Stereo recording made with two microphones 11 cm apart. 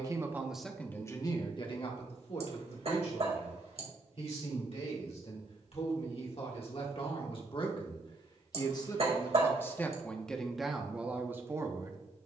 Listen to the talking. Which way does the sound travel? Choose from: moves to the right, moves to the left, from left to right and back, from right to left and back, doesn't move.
from right to left and back.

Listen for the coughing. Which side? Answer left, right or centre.
right.